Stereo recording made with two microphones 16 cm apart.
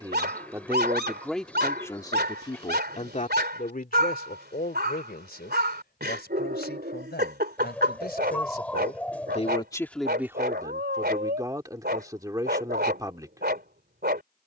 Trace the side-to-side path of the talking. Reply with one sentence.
You can hear the talking move from right to left and back again.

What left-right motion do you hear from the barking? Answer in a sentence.
You can hear the barking stay in one place.